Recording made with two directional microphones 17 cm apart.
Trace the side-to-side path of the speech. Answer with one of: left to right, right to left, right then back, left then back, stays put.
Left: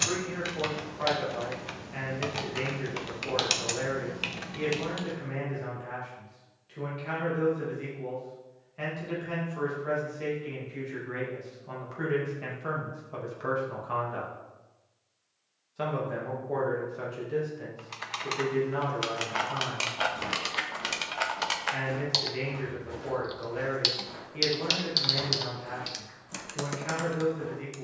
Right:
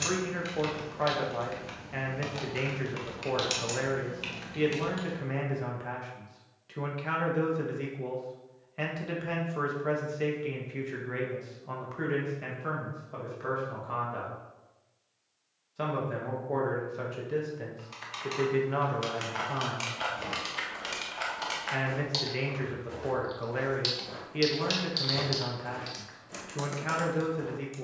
left then back.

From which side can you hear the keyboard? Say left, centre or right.
left.